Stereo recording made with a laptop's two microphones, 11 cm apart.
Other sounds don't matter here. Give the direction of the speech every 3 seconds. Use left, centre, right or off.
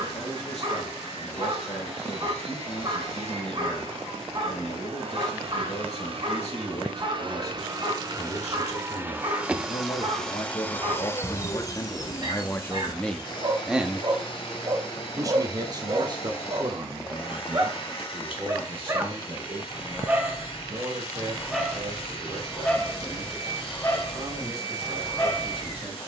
left, left, left, left, centre, right, right, right, right.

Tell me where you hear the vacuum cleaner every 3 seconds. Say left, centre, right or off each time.
right, right, right, centre, left, left, left, left, left.